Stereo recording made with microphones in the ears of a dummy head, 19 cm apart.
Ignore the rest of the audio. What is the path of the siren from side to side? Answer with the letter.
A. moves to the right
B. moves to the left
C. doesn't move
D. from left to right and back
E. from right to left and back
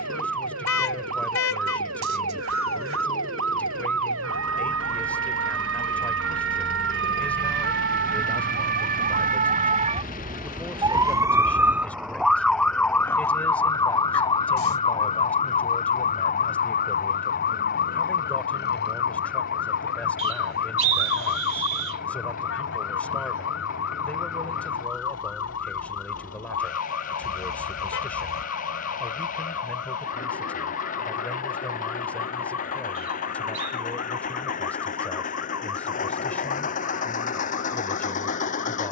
B.